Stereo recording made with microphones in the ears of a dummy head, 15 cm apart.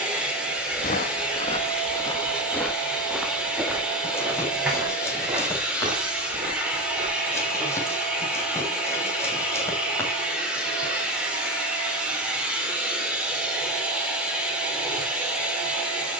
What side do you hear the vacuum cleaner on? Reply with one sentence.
You can hear the vacuum cleaner in the centre.